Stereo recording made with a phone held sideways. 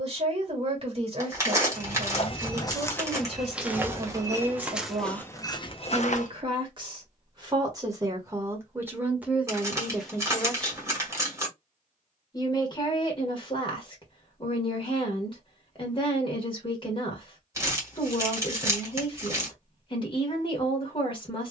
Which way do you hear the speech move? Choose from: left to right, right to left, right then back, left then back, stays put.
right to left.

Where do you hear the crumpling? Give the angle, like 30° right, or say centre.
20° right.